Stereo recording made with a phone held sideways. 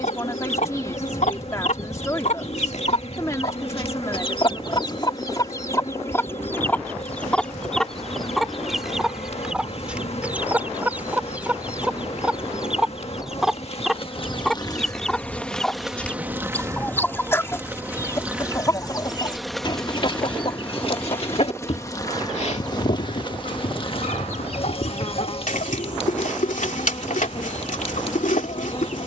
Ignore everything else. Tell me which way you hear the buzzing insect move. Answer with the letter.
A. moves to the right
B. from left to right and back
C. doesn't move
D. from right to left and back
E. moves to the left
B.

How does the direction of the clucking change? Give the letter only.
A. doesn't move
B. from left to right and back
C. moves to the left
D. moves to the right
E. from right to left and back
B.